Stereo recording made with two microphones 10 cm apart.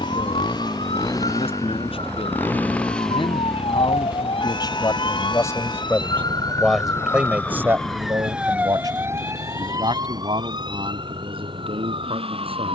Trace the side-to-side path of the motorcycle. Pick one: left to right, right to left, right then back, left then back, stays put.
left to right.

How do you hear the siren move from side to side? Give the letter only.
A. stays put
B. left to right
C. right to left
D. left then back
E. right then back
B.